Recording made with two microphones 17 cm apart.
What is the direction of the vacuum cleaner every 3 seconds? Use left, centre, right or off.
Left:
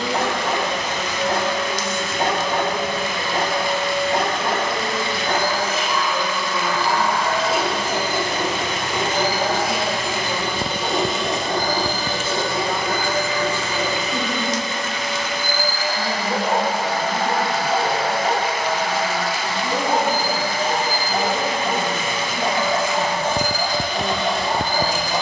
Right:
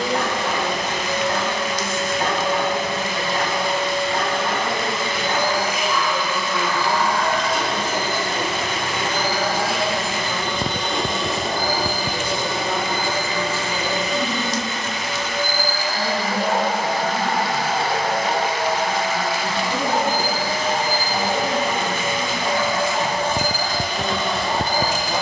right, right, centre, centre, right, right, right, right, right.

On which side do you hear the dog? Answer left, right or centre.
left.